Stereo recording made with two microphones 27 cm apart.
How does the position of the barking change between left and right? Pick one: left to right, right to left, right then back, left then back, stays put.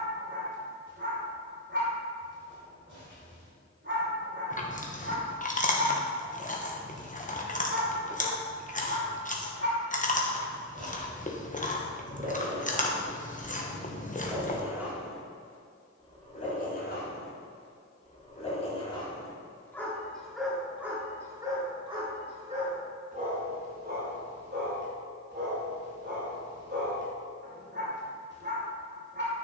left then back.